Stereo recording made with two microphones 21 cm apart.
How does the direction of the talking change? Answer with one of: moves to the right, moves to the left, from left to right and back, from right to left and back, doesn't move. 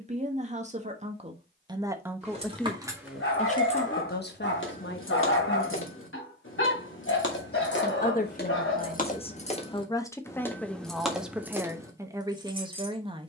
from right to left and back.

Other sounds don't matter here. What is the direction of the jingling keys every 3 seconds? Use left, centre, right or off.
right, left, left, centre, right.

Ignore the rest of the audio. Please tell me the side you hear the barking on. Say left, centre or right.
left.